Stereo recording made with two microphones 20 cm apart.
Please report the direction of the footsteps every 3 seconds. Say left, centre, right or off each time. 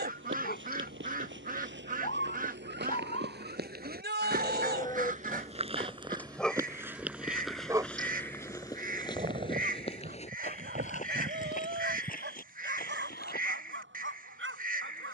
right, right, centre, left, left.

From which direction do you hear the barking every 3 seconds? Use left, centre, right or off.
left, left, centre, right, right.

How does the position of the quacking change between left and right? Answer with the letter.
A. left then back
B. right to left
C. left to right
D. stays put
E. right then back
D.